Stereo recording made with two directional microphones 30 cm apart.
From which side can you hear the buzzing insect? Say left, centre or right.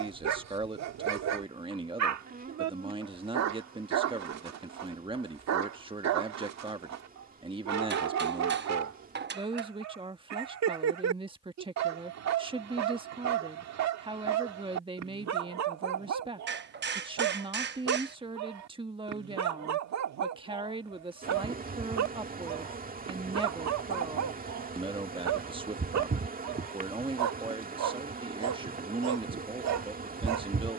right.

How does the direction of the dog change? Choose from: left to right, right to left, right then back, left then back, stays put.
stays put.